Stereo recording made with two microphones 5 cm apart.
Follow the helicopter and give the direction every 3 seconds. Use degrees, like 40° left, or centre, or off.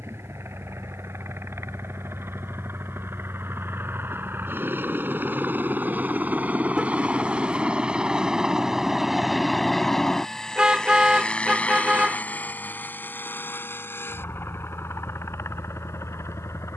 60° right, 50° right, 20° right, 10° left, 40° left, 50° left.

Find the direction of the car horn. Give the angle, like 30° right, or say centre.
20° right.